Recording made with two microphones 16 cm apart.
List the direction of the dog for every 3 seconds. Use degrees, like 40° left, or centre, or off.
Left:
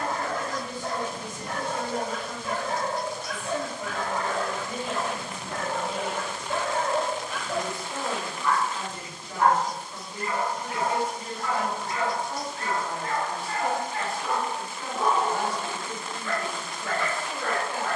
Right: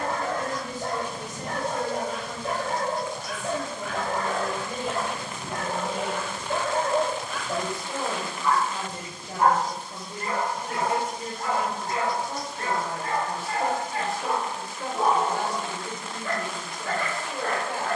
50° right, 40° right, centre, 40° right, 50° right, 50° right.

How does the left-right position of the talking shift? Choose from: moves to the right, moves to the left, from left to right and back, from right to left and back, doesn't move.
doesn't move.